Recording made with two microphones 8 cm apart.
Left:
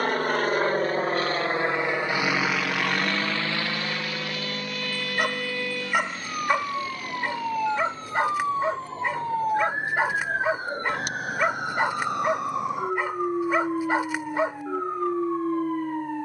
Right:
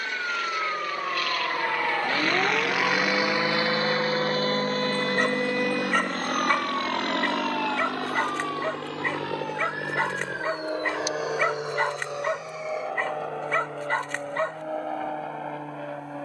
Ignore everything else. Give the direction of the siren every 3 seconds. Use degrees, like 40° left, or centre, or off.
60° right, 40° right, 10° left, 40° left, 60° left, 60° left.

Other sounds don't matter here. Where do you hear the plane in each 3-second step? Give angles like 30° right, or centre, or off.
30° left, 30° right, 60° right, 70° right, 70° right, 70° right.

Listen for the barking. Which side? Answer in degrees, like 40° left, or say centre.
10° left.